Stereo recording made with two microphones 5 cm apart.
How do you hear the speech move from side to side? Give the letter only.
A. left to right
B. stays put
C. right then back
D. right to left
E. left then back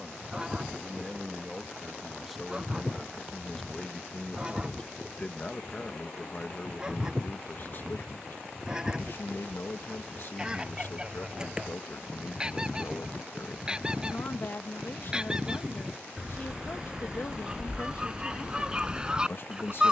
D.